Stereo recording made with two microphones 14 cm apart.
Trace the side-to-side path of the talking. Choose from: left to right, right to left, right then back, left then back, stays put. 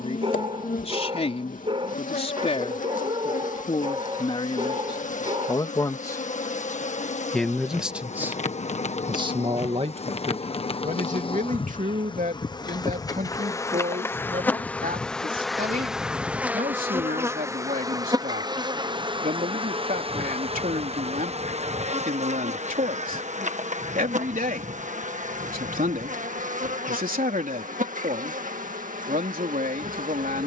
left to right.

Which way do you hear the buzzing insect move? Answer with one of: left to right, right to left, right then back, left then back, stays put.
left to right.